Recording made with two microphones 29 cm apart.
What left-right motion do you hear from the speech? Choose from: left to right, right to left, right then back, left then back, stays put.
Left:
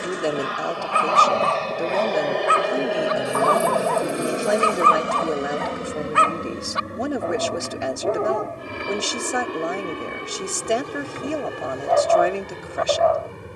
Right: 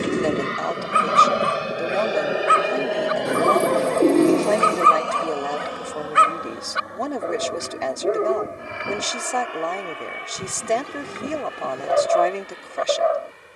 stays put.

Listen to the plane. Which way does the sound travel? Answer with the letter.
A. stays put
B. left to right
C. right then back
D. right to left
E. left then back
D.